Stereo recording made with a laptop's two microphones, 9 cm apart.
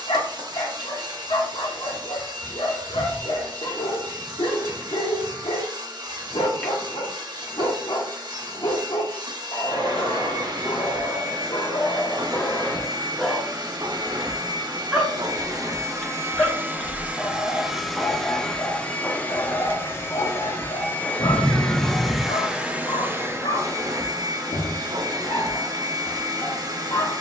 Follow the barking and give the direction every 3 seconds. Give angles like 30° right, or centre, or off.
80° left, 80° left, 80° left, 60° left, 20° left, 10° left, 40° left, 70° left, 70° left.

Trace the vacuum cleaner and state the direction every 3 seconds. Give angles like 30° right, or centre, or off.
50° right, 50° right, 50° right, 50° right, 50° right, 30° right, 20° left, 10° right, 50° right.